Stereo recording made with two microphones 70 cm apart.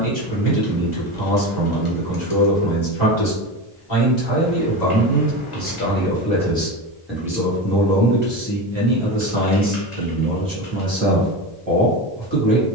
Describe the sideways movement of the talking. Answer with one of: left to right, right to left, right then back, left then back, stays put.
left to right.